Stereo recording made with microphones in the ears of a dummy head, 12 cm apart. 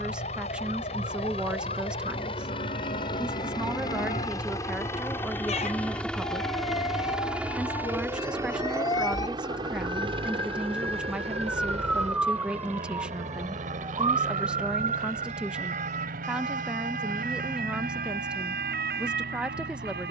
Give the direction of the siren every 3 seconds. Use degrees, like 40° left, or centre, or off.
60° left, 50° left, 40° left, 10° left, 30° right, 50° right, 70° right.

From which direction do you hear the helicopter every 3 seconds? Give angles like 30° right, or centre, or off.
50° left, 20° left, 10° right, 40° right, 60° right, 70° right, 70° right.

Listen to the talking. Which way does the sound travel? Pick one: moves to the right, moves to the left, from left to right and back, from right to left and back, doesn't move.
doesn't move.